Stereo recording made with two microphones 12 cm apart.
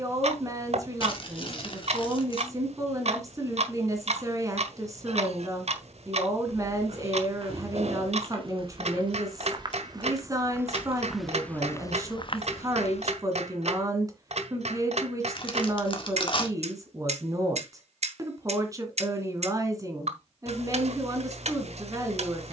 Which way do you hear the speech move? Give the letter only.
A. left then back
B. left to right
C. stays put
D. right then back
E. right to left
C.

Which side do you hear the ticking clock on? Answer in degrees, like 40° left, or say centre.
60° right.